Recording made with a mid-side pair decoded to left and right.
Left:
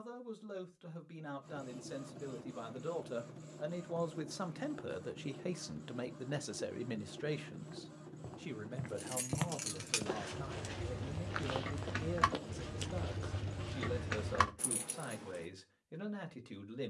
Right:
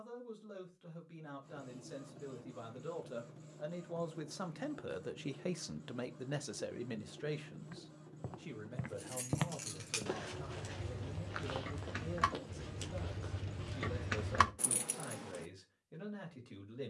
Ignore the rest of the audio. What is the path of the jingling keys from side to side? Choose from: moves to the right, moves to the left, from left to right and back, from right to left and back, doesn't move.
moves to the right.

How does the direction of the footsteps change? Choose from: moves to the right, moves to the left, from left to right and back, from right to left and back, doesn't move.
moves to the left.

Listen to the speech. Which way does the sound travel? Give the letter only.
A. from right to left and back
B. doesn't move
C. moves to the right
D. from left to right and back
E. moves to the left
D.